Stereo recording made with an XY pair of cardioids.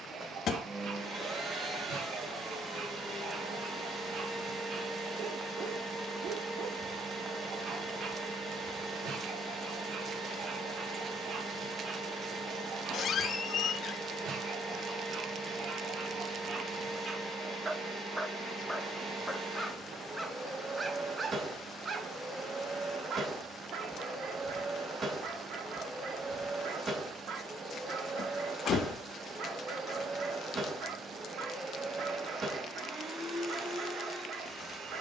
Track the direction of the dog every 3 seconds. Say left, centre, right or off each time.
right, right, right, right, right, right, centre, right, right, right, right, right.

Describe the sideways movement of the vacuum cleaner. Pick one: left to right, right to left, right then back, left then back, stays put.
stays put.